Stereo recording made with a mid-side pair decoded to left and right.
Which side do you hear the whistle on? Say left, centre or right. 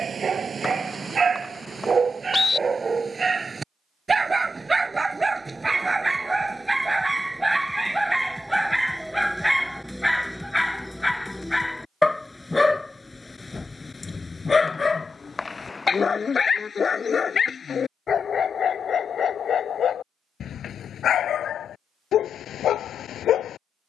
left.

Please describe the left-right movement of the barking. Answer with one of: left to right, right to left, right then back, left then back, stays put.
right to left.